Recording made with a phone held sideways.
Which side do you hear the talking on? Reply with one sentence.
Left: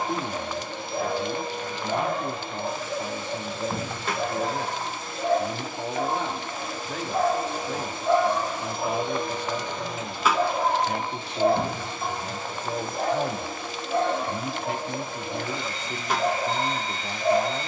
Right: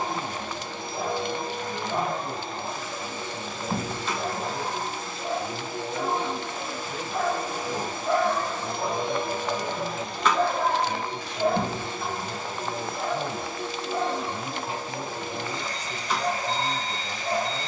In this clip you hear the talking on the left.